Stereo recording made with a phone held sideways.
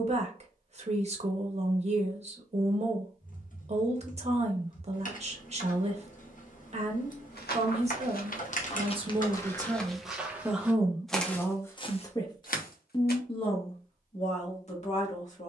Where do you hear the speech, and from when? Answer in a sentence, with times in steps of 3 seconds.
In this clip you hear the speech on the right from 0 s, in the centre from 9 s and on the left from 12 s.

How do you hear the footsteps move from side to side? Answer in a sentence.
You can hear the footsteps move from left to right and back again.